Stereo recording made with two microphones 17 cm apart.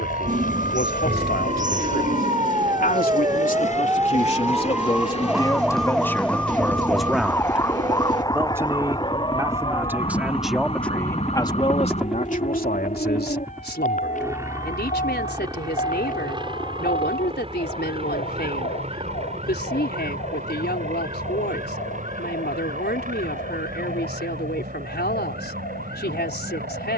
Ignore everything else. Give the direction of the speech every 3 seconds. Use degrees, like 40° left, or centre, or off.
70° left, 40° left, centre, centre, 70° left, 80° left, 80° left, 80° left, 80° left.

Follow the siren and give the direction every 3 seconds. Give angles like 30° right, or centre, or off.
40° right, 10° right, 20° left, 30° left, 40° left, 50° left, 60° left, 60° left, 60° left.